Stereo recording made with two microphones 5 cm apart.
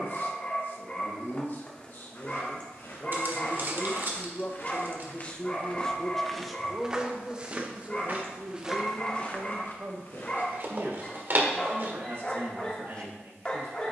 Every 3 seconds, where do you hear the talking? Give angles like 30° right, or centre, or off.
50° left, 30° left, 20° right, 60° right, 70° right.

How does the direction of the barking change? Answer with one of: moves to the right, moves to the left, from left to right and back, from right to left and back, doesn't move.
doesn't move.